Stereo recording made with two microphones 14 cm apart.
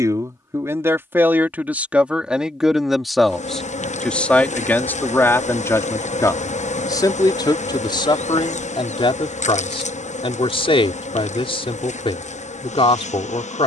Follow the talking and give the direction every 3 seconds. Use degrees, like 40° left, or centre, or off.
10° right, 10° left, 30° left, 40° left, 40° left.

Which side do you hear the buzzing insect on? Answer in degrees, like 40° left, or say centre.
60° left.